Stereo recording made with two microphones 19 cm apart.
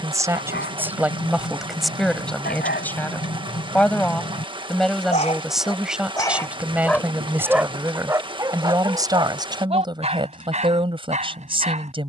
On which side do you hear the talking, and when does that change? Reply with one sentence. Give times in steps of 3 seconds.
You can hear the talking in the centre from 0 s and on the right from 9 s.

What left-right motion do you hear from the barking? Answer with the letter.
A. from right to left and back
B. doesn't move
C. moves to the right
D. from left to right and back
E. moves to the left
C.